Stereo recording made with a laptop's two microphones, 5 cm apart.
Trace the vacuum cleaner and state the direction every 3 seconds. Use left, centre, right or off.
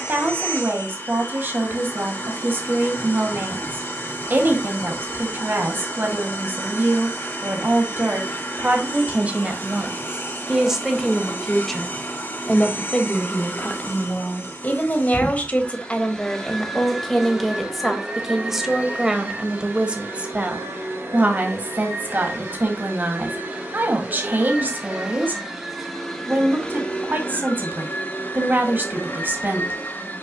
left, left, left, left, left, centre, right, right, centre, left.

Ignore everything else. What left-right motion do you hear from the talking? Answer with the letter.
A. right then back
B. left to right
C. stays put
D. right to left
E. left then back
E.